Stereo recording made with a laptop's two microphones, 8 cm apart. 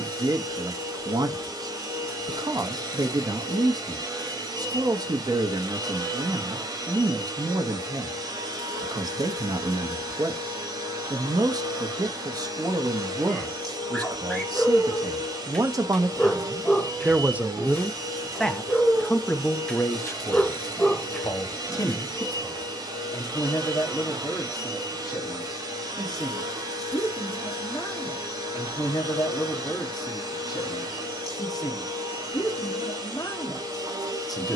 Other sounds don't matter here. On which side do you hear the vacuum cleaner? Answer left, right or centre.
right.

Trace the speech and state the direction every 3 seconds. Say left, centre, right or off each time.
right, right, right, right, right, right, left, left, left, left, left, left.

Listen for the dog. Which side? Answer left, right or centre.
centre.